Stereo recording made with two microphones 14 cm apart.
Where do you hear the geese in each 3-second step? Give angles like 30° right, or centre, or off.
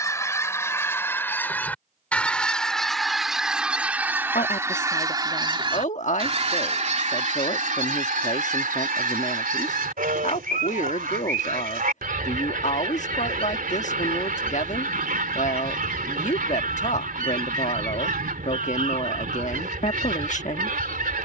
10° left, 20° right, 60° right, 80° right, 80° right, 80° right, 80° right.